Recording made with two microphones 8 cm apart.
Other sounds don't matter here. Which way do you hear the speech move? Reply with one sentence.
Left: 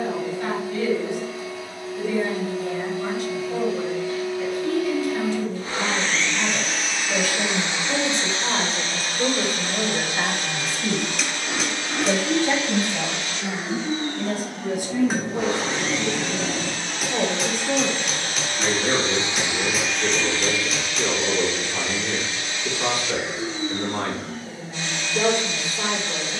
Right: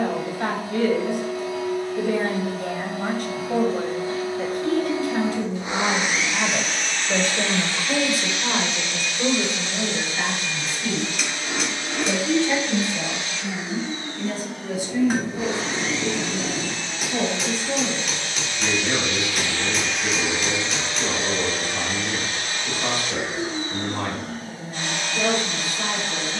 In this clip you hear the speech move from right to left.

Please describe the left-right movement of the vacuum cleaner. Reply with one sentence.
You can hear the vacuum cleaner go left and come back.